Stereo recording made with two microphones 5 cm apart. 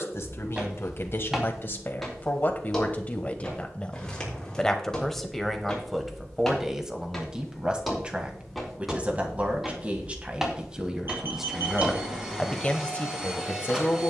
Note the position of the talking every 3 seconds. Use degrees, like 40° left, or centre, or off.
40° left, 10° left, 20° right, 20° right, 30° left.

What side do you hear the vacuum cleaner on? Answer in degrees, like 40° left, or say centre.
10° right.